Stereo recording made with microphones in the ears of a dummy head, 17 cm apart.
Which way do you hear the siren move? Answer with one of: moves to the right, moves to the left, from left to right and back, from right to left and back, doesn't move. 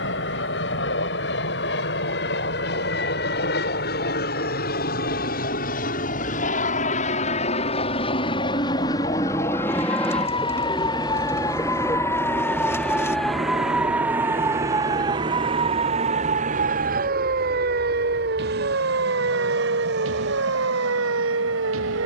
moves to the right.